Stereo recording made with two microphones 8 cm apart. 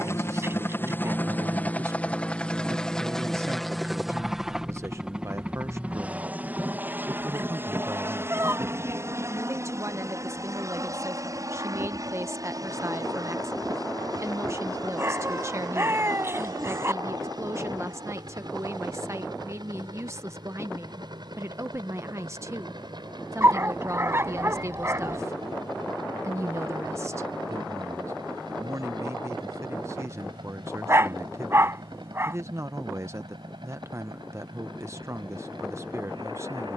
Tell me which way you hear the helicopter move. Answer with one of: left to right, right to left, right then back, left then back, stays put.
left to right.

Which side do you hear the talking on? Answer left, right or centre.
right.